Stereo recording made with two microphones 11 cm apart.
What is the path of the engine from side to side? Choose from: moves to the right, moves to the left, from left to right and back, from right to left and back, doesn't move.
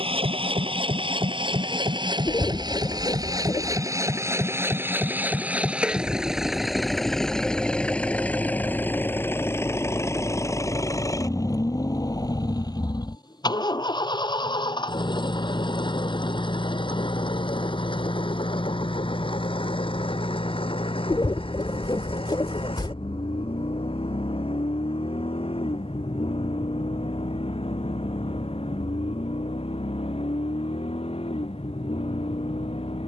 moves to the left.